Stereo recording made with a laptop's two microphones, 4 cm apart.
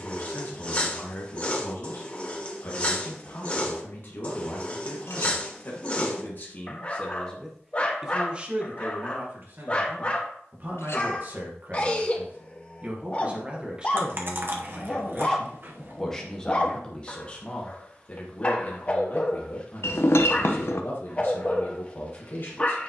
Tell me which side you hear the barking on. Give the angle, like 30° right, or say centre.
30° left.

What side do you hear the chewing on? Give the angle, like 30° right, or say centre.
50° right.